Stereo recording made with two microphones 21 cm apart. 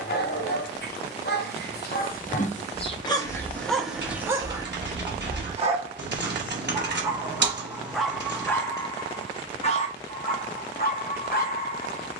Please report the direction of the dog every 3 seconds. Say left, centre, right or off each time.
left, centre, centre, left.